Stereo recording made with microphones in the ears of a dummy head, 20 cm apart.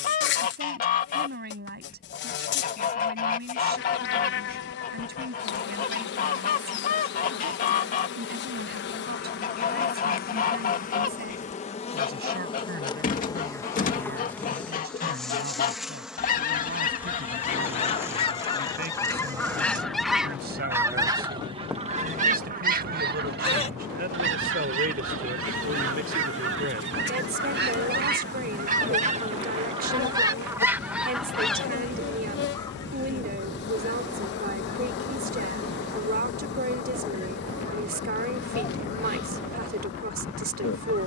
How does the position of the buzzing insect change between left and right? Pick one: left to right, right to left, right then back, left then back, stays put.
right then back.